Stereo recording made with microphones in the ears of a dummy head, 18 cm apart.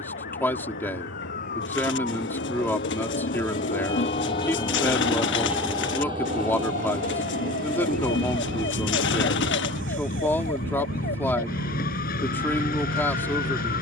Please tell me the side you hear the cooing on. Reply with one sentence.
In this clip you hear the cooing on the left.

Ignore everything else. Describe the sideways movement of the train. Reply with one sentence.
In this clip you hear the train move from left to right.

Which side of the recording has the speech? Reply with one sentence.
You can hear the speech in the centre.